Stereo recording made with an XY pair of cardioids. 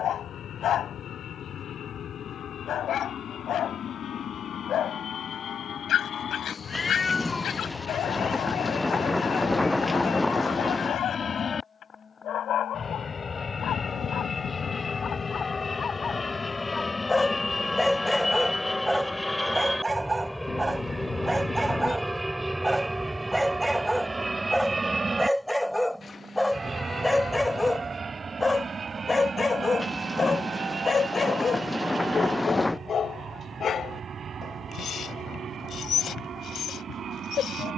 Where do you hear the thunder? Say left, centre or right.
centre.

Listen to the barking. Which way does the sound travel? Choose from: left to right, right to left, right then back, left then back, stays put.
right then back.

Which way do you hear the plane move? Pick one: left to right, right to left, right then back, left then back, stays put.
left to right.